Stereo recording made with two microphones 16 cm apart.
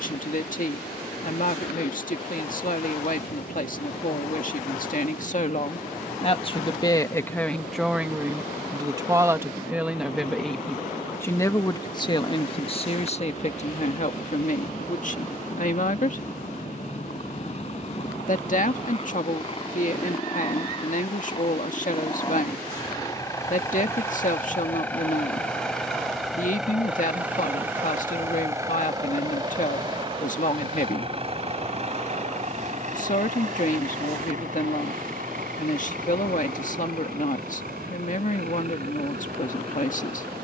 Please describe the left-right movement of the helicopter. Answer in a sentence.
You can hear the helicopter go from the left side to the right.